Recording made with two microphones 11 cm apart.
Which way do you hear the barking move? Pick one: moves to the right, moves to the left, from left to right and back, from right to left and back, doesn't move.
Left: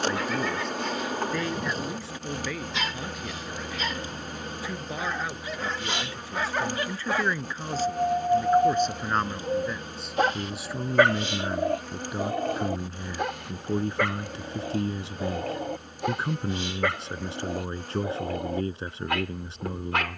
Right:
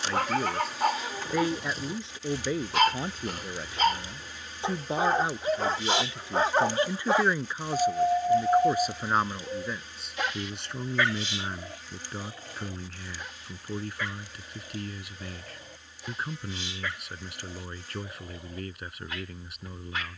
moves to the left.